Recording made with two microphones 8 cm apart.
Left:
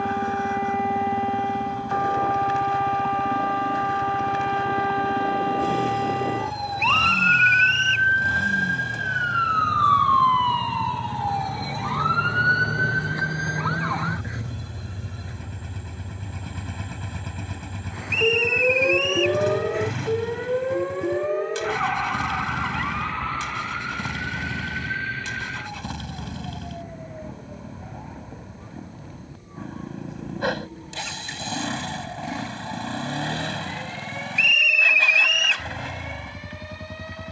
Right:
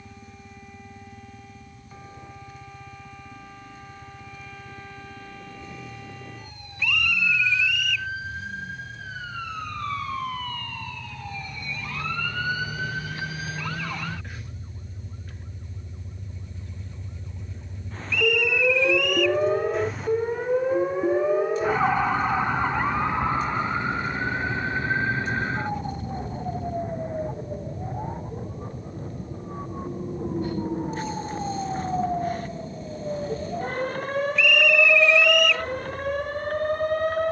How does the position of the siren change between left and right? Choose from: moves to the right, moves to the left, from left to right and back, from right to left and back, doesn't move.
moves to the right.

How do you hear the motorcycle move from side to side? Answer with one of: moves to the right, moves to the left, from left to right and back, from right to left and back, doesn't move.
doesn't move.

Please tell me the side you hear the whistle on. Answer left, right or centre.
centre.